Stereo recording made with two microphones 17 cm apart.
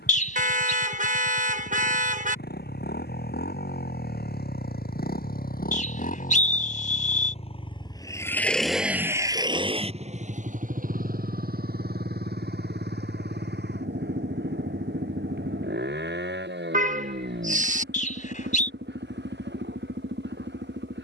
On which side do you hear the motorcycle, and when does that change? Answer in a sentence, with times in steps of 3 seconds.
You can hear the motorcycle on the left from 0 s and on the right from 9 s.